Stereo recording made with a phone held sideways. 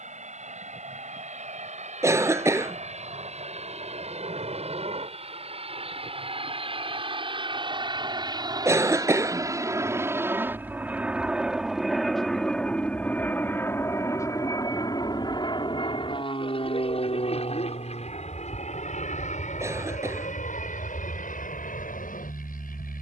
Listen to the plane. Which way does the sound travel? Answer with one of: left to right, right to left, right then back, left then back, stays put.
right to left.